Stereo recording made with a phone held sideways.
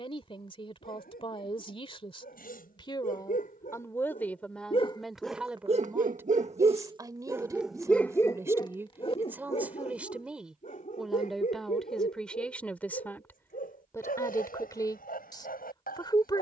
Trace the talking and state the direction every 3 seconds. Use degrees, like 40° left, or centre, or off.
30° left, 10° left, 20° right, centre, 10° left, 30° left.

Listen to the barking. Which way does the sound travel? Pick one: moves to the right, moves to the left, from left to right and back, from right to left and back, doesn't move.
from left to right and back.